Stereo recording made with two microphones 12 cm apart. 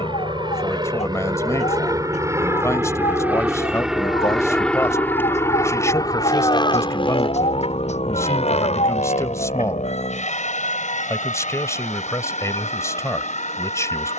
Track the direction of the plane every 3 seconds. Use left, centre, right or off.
right, centre, left, left, left.